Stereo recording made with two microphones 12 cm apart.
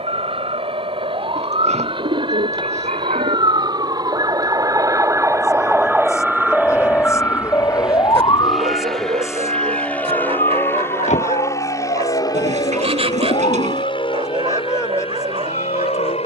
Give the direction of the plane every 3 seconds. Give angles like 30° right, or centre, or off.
50° right, 30° right, 10° right, 20° left, 40° left, 50° left.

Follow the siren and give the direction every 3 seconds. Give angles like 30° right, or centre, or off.
50° right, 30° right, 20° left, 60° left, 80° left, 80° left.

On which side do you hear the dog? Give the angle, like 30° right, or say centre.
50° right.